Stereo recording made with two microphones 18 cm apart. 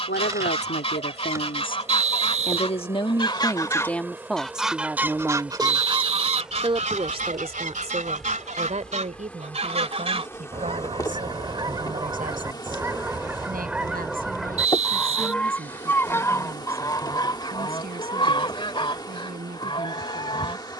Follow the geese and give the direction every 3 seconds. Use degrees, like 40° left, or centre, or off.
30° left, centre, 40° right, 30° right, 10° right, 20° left, 30° left.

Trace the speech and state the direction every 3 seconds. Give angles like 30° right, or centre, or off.
50° left, centre, 40° right, 50° right, 50° right, 60° right, 60° right.